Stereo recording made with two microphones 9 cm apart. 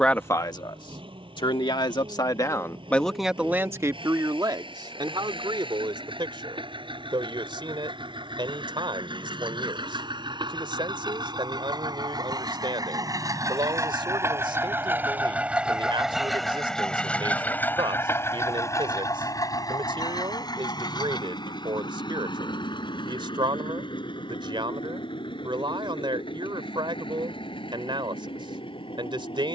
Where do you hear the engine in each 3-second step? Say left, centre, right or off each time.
right, right, right, right, right, centre, left, left, left, left.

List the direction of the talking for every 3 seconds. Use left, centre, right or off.
left, right, right, right, right, right, right, right, right, right.